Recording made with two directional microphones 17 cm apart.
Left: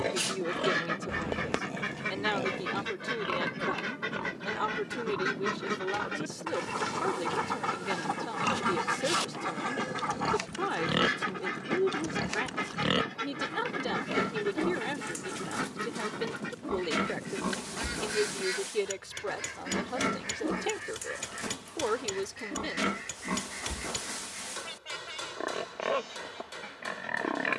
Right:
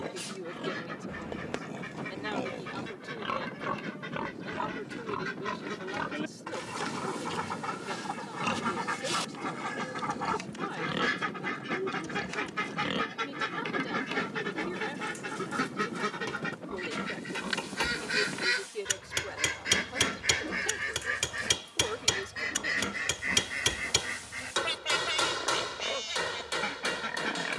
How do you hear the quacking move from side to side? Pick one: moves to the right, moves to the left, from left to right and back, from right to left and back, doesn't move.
moves to the right.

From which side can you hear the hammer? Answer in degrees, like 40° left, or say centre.
60° right.